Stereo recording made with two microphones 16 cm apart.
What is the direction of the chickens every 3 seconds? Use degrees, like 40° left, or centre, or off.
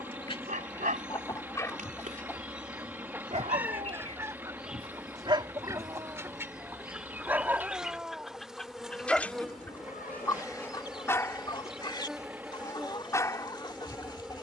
20° left, 20° right, 10° right, 20° left, 30° left.